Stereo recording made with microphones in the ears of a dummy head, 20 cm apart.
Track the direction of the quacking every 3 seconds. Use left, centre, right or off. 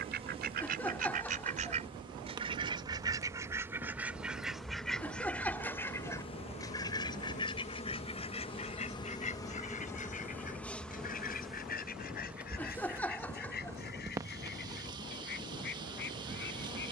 right, centre, left, left, left, left.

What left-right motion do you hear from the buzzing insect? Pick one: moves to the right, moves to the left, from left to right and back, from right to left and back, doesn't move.
from right to left and back.